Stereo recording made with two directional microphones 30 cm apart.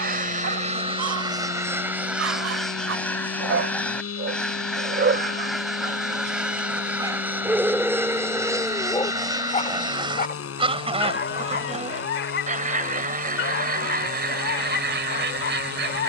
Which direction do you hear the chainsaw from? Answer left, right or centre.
left.